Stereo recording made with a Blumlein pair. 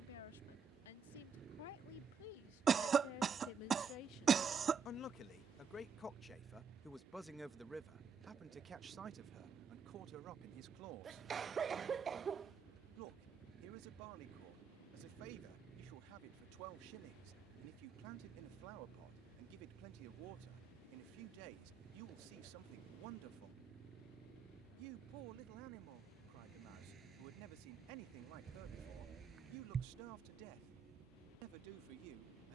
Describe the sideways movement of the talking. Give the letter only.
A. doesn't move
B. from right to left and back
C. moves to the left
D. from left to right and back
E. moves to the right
E.